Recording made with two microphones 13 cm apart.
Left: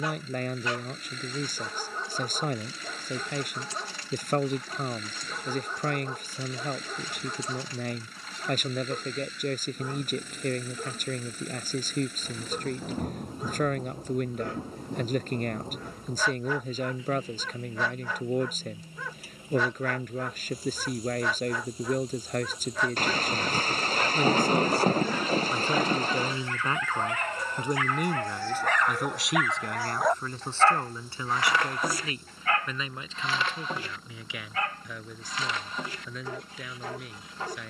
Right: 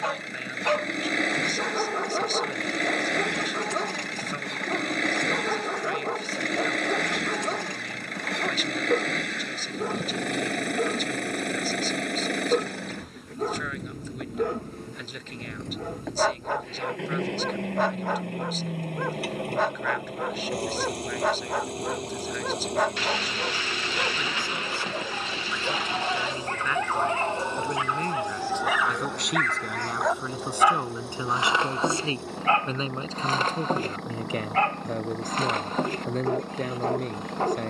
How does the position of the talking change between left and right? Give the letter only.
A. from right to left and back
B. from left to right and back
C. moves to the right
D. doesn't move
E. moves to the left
C.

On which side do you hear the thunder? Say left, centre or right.
left.